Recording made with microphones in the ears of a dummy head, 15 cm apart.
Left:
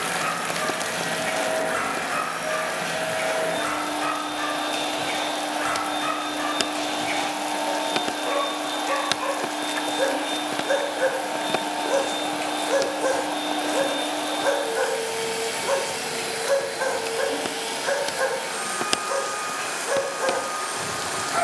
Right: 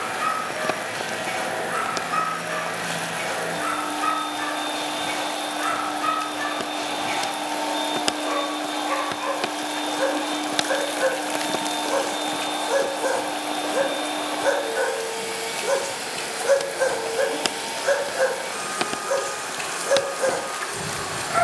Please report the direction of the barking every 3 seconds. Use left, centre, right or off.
left, left, left, left, centre, right, right.